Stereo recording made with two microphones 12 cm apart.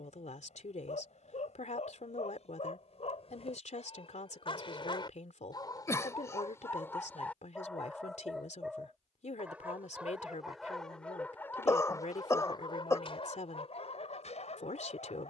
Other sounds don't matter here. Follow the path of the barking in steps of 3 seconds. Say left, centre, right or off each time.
left, left, centre, centre, left.